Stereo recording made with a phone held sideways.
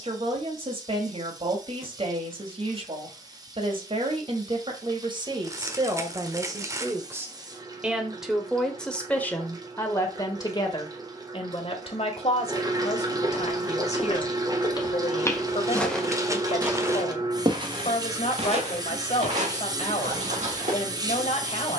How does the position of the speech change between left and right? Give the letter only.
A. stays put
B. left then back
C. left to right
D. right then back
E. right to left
E.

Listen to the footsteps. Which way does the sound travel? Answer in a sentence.
You can hear the footsteps travel towards the right.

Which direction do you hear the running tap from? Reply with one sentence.
You can hear the running tap on the right.